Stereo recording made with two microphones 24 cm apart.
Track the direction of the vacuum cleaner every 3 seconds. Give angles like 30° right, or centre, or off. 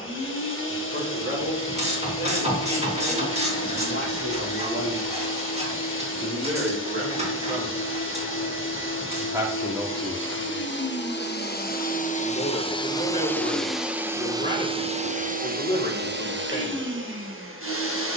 50° left, 50° left, 50° left, 50° left, centre, 50° right.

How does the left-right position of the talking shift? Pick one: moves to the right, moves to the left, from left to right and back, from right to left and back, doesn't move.
moves to the left.